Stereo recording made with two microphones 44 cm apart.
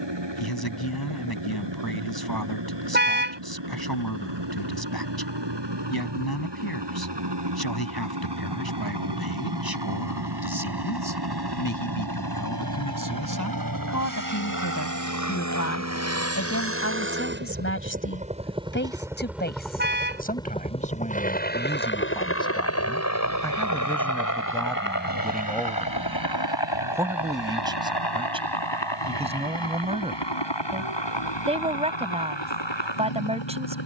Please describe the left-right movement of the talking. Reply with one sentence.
You can hear the talking move from left to right.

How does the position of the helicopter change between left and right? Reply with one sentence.
In this clip you hear the helicopter move from right to left.